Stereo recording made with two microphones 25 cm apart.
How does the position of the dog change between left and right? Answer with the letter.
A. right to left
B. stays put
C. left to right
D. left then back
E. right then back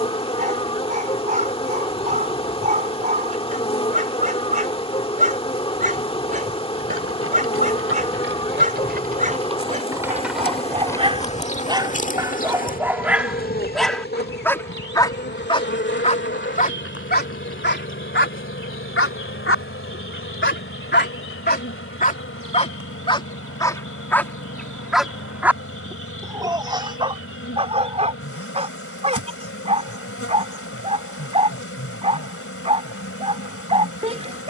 D.